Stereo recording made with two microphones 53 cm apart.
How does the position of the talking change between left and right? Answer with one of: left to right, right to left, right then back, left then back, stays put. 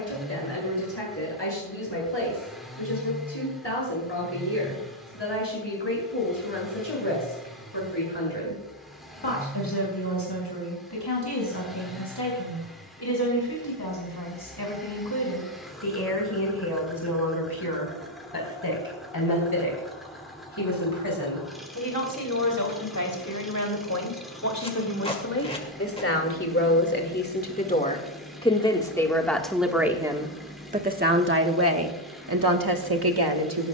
left to right.